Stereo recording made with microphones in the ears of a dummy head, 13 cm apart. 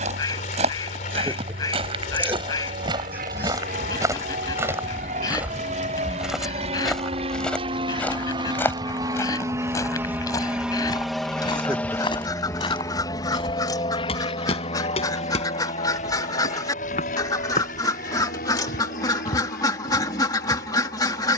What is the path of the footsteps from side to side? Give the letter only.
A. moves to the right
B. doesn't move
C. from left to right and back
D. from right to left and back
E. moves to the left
E.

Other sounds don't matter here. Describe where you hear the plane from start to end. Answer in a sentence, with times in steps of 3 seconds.
You can hear the plane on the right from 0 s, in the centre from 9 s and on the left from 12 s.